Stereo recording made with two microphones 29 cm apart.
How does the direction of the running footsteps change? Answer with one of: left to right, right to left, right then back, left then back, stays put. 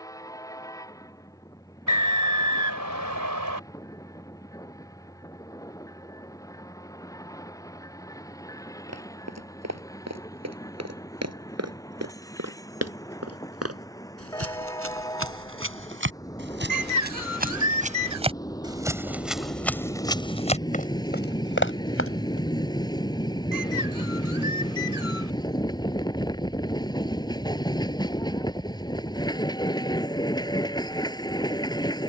right to left.